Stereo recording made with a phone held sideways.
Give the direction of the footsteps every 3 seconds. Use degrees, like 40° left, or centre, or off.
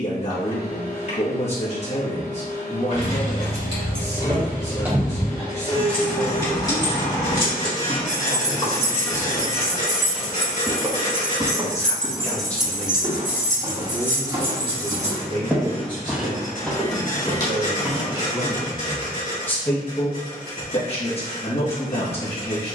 off, off, 40° left, 10° right, 30° right, centre, 40° left, off.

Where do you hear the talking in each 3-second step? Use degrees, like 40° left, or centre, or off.
40° left, 40° left, 40° left, 40° left, 20° right, 40° right, 10° left, 40° left.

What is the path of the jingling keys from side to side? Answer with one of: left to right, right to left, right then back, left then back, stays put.
left then back.